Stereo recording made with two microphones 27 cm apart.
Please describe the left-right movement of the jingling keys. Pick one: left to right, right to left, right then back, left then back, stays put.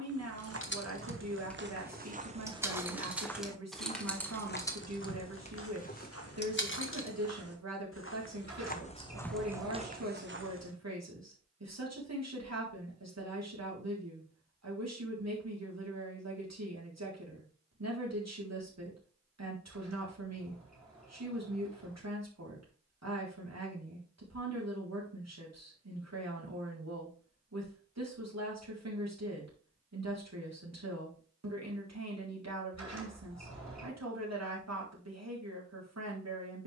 right then back.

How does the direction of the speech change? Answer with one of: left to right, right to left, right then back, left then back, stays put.
stays put.